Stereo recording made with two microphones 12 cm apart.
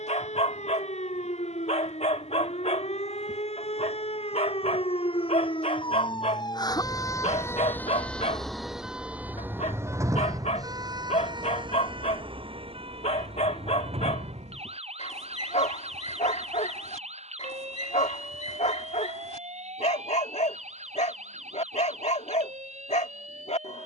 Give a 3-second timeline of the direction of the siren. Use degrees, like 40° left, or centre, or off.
70° left, 60° left, 20° left, 30° right, 50° right, 60° right, 70° right, 70° right.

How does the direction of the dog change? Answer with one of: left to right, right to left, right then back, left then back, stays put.
stays put.